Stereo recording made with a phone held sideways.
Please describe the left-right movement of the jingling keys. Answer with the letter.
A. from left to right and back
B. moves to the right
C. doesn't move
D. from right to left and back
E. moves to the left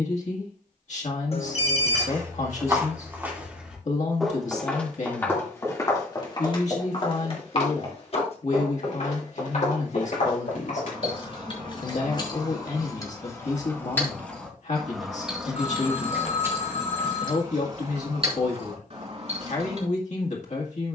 B.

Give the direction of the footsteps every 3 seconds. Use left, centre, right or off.
right, centre, left, left, off, off, off.